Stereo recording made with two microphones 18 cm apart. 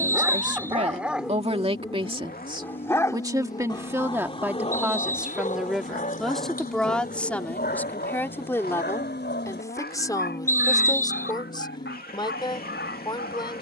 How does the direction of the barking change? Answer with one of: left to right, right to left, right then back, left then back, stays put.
right to left.